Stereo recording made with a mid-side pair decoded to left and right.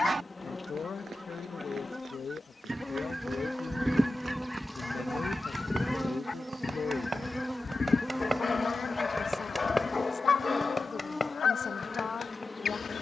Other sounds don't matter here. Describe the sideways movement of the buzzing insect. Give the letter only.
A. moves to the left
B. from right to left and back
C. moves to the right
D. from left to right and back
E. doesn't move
D.